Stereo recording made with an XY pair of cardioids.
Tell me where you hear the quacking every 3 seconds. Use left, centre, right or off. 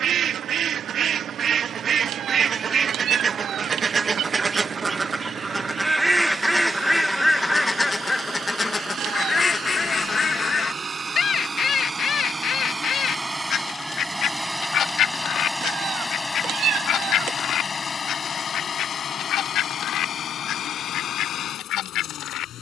right, right, centre, left, left, left, left, left.